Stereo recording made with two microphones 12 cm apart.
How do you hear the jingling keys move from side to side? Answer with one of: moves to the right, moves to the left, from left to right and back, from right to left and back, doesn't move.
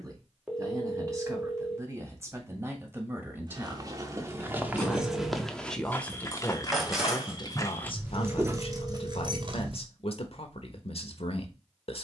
moves to the right.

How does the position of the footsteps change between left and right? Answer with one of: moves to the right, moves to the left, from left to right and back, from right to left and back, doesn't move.
from right to left and back.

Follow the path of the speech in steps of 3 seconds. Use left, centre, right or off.
right, centre, left, left.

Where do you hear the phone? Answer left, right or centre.
centre.